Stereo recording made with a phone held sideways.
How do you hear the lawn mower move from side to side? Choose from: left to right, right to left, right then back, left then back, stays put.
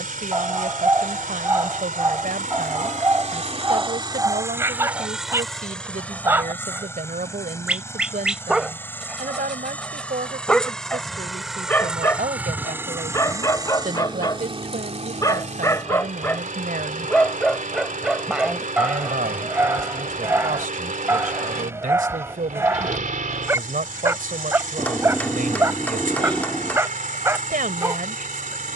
left then back.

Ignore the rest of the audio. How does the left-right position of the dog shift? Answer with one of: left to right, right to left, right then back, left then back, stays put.
left then back.